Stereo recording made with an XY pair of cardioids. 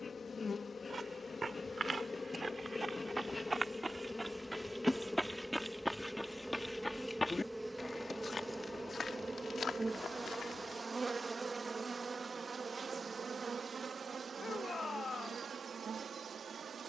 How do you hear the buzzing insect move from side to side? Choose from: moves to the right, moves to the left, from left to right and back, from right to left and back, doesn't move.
moves to the right.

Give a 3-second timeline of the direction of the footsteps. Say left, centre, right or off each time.
right, centre, left, left, off, off.